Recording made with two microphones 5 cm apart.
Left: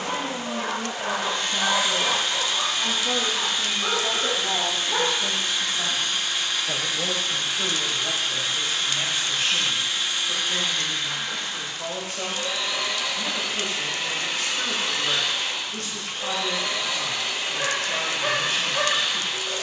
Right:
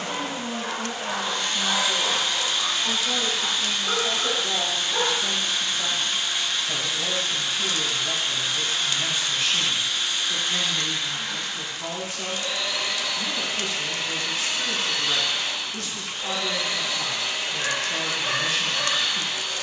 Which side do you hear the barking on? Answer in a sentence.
In this clip you hear the barking on the left.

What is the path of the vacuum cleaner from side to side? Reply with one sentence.
You can hear the vacuum cleaner stay in one place.